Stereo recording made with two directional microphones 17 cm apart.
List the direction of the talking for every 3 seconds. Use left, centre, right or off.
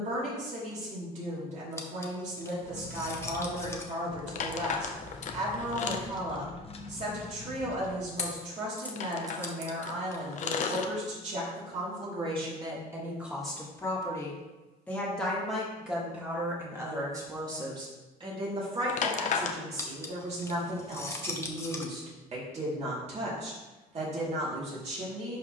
right, right, right, right, centre, centre, right, right, right.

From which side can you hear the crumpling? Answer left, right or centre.
left.